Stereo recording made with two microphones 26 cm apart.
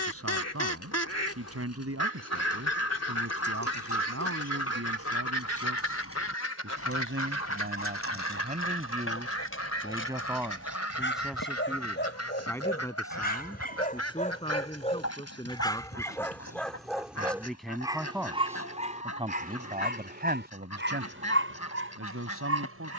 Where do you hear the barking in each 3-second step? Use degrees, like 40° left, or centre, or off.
70° left, 60° left, 60° left, 50° left, 30° left, centre, 30° right, 60° right.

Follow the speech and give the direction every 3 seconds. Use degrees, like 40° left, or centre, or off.
70° right, 70° right, 40° right, 10° right, 20° left, 10° left, 30° right, 60° right.